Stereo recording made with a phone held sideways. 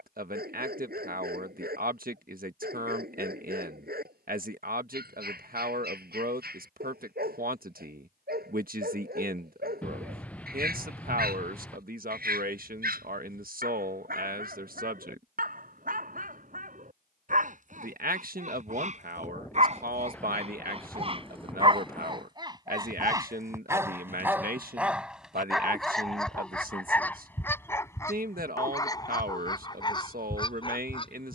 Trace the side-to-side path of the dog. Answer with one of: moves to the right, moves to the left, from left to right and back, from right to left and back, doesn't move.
moves to the left.